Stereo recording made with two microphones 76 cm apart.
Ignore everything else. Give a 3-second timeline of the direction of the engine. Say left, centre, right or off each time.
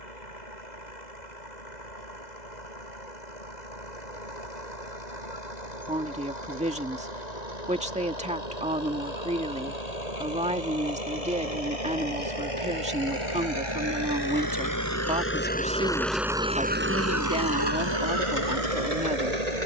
left, left, left, left, left, centre, right.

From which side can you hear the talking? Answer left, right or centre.
centre.